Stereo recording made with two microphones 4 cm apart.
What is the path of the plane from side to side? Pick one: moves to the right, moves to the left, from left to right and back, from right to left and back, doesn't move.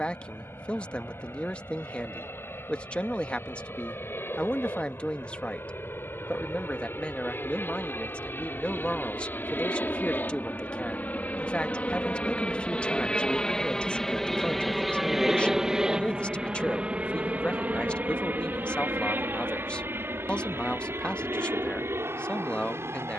moves to the right.